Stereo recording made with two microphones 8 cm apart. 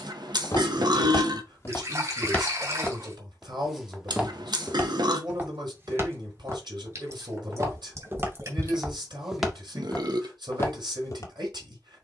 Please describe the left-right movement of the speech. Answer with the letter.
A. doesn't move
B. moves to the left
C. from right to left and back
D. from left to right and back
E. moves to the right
A.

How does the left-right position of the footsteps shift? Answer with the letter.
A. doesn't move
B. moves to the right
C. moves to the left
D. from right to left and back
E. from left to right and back
E.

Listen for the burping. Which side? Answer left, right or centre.
right.